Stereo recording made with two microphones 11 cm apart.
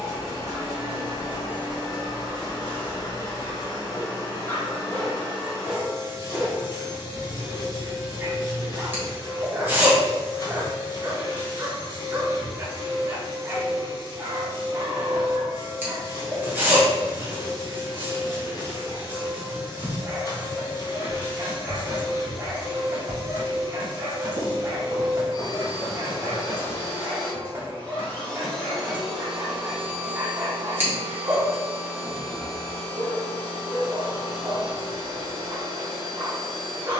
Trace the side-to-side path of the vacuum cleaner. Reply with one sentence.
In this clip you hear the vacuum cleaner move to the right.